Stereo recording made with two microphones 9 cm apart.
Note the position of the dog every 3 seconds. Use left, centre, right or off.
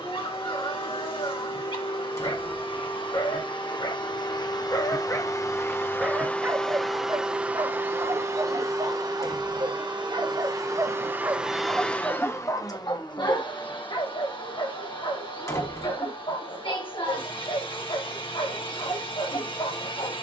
left, left, right, right, left, left, left.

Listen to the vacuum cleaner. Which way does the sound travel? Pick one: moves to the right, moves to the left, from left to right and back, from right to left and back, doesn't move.
from left to right and back.